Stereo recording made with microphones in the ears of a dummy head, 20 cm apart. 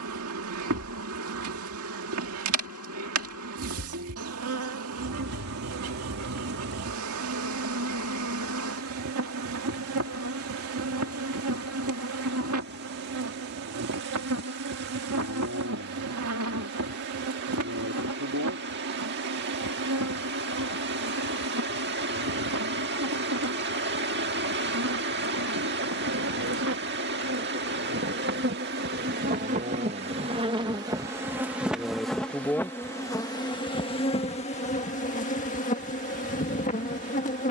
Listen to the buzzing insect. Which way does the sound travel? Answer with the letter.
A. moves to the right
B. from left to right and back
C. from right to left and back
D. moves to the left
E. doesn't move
D.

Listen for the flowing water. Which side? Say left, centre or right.
right.